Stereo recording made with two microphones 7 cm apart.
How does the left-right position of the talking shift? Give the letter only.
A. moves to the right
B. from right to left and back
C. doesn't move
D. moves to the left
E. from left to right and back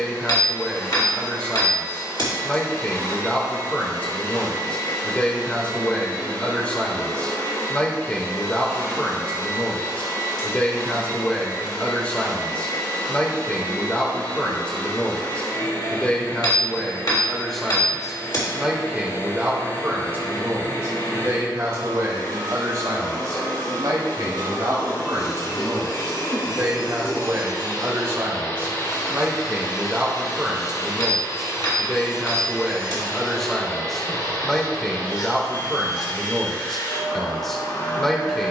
E.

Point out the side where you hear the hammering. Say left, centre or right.
left.